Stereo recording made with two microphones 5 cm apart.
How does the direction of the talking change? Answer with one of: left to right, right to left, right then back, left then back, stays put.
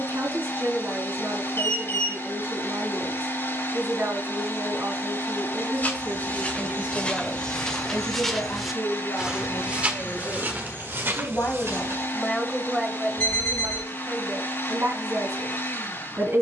left then back.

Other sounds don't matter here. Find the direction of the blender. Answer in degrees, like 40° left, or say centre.
60° left.